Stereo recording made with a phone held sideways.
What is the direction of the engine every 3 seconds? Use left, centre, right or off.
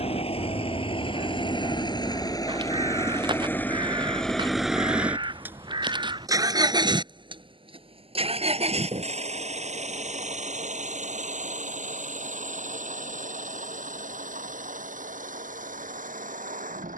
left, centre, right, right, right, right.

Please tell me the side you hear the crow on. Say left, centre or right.
right.